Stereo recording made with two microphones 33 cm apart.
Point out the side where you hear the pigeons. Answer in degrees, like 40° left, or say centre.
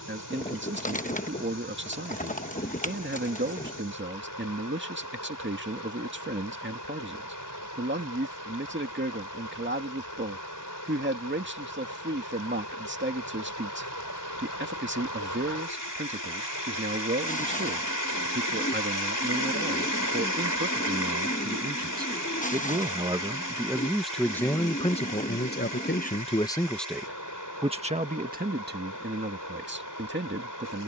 20° left.